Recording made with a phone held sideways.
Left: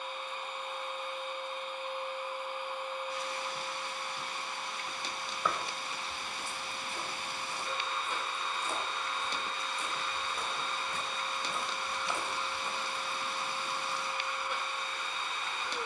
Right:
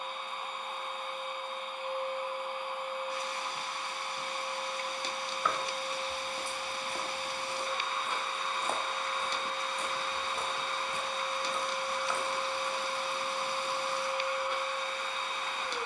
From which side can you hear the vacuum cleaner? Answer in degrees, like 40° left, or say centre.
60° right.